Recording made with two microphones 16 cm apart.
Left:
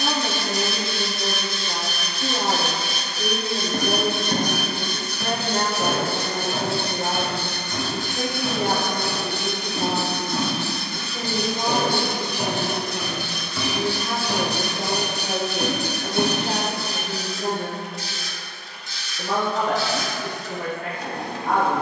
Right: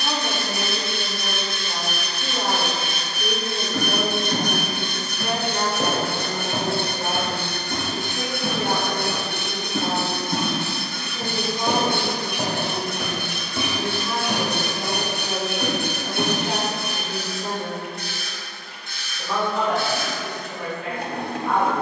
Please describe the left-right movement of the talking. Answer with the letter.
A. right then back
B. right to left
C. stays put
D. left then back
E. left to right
C.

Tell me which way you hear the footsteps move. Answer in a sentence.
You can hear the footsteps go right and come back.